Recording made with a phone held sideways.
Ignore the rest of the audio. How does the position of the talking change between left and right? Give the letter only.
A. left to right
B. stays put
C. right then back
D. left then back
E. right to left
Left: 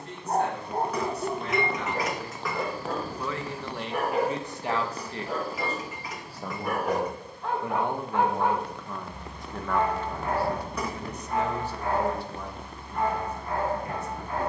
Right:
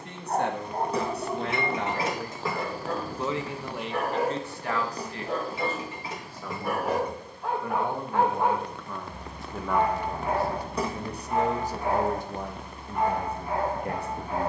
D.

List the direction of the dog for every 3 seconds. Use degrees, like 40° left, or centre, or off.
30° left, 10° left, 10° right, 10° right, 10° right.